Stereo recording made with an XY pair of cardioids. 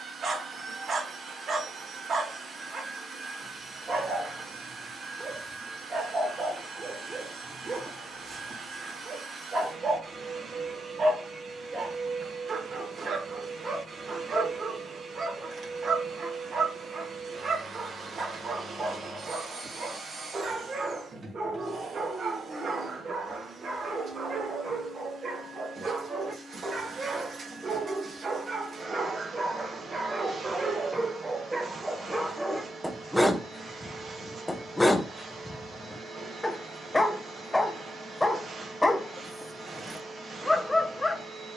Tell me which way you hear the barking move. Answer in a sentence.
In this clip you hear the barking move from right to left.